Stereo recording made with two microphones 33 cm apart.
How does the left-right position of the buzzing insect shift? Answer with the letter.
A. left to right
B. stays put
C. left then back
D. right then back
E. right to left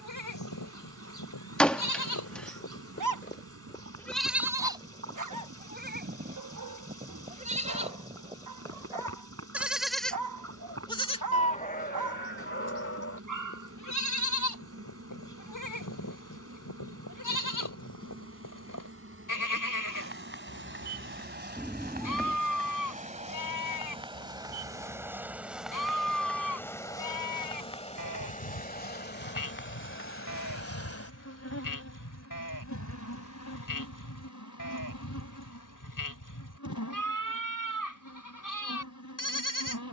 E.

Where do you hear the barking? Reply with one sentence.
In this clip you hear the barking on the right.